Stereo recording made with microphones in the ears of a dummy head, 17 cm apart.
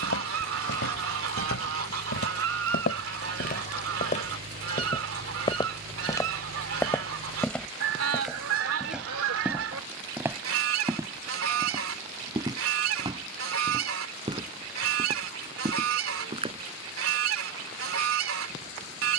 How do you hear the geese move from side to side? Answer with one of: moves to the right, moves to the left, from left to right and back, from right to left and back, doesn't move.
doesn't move.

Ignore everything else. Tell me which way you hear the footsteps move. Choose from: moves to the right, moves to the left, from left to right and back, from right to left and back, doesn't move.
moves to the right.